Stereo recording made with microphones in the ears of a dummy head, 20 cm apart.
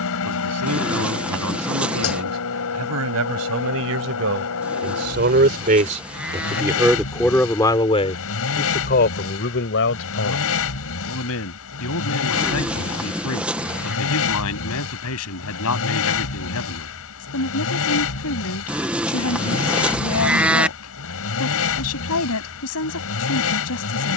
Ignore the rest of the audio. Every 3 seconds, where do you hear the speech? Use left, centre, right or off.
right, right, centre, left, left, left, left, left.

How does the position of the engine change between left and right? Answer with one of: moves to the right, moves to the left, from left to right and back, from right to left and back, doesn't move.
doesn't move.